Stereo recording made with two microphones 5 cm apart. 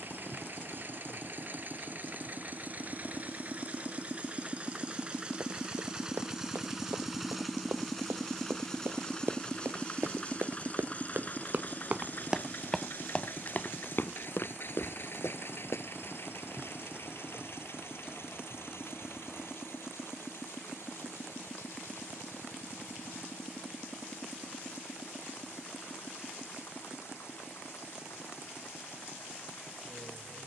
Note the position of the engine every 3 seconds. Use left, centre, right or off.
right, right, centre, left, left, left, left, left, left, left.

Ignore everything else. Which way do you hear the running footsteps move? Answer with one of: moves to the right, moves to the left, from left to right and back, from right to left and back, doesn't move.
moves to the left.